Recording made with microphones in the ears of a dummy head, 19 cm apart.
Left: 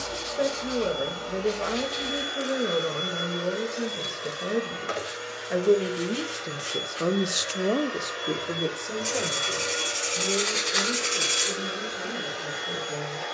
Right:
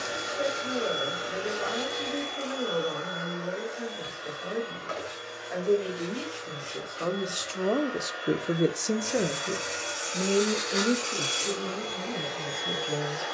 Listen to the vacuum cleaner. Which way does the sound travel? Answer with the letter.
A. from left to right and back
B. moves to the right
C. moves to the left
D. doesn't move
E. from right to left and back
E.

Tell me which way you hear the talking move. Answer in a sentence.
You can hear the talking travel towards the right.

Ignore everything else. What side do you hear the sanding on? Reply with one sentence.
You can hear the sanding on the left.